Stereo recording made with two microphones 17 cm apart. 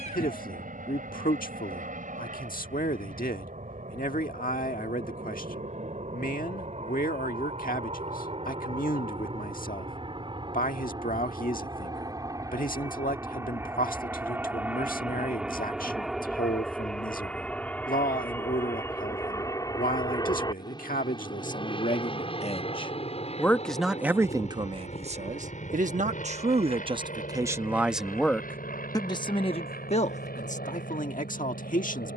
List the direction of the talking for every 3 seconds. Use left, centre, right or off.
left, left, left, left, left, left, left, left, right, centre, left.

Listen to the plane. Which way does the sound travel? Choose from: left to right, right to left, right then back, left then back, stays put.
right to left.